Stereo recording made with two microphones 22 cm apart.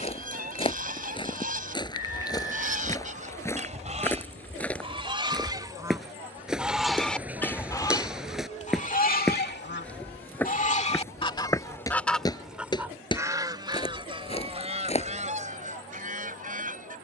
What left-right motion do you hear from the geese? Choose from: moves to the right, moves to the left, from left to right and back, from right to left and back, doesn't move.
from right to left and back.